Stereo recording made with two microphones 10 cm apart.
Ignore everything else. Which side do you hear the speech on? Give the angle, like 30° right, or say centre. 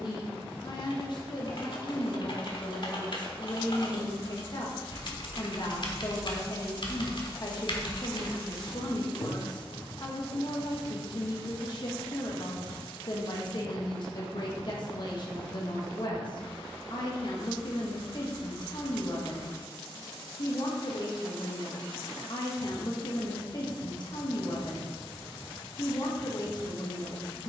50° left.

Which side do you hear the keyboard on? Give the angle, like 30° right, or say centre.
50° left.